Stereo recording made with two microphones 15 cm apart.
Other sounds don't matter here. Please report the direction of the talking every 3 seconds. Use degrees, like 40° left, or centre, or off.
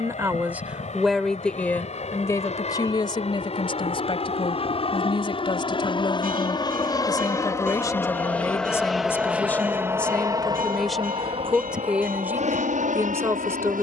10° left, 40° left, 20° left, centre, 20° right.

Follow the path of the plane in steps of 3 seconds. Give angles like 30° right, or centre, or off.
60° left, 50° left, 20° left, 30° right, 50° right.